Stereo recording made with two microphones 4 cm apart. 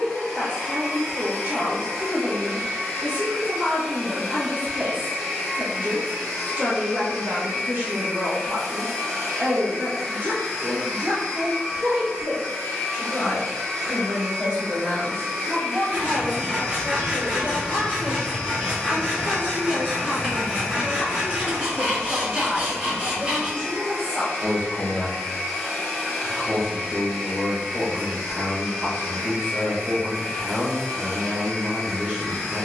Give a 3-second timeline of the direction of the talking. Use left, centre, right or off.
right, right, right, right, right, centre, centre, centre, right, right, right.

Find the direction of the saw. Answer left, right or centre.
right.